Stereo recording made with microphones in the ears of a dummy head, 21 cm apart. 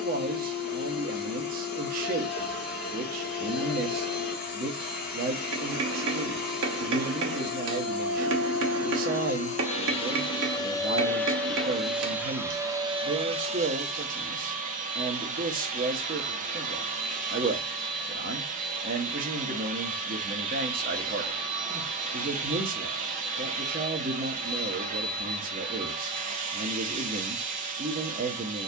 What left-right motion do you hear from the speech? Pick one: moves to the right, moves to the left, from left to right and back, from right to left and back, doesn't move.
doesn't move.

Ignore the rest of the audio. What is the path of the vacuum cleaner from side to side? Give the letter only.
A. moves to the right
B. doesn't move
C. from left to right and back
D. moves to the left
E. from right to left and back
A.